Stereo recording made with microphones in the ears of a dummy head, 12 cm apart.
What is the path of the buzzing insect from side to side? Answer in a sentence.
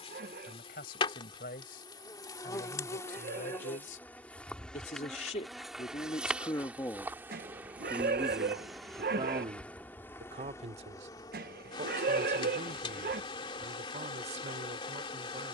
In this clip you hear the buzzing insect move from left to right and back again.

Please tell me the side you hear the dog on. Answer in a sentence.
You can hear the dog on the right.